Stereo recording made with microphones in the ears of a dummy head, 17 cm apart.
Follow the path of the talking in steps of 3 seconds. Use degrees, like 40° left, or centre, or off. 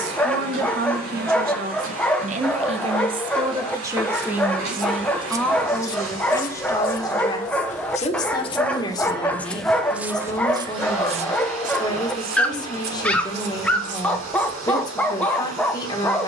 50° right, 10° right, 20° left, 20° left, 20° left, 20° left.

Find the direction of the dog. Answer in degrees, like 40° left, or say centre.
10° left.